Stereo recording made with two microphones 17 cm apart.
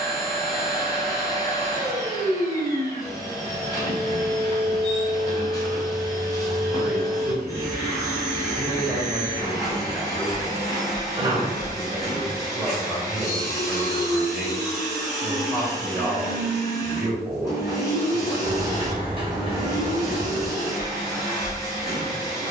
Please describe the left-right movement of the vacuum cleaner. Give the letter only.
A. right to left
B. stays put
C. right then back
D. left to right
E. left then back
B.